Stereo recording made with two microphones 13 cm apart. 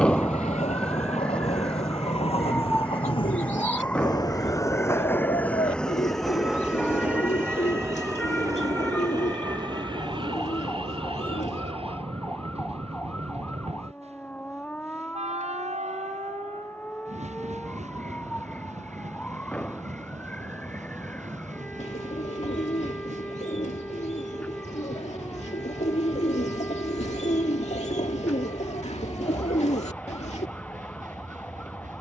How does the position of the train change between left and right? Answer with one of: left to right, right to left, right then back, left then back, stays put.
left to right.